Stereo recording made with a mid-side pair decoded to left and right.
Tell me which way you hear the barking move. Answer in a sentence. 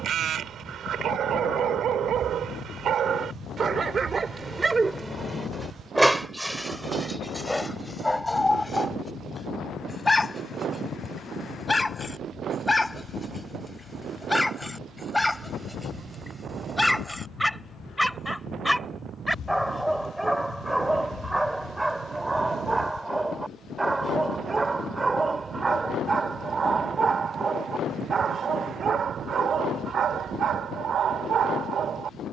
In this clip you hear the barking move from right to left and back again.